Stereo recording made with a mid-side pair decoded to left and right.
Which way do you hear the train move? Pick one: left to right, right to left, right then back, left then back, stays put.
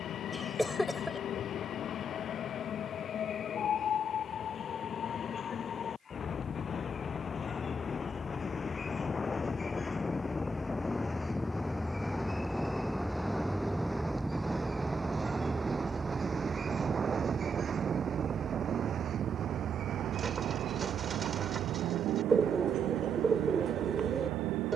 left to right.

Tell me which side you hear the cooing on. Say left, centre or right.
right.